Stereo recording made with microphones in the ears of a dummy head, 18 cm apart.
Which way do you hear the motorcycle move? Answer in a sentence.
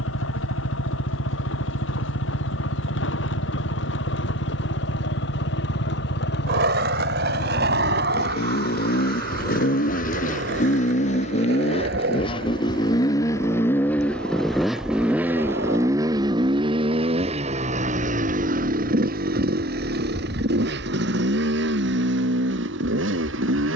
In this clip you hear the motorcycle go from the left side to the right.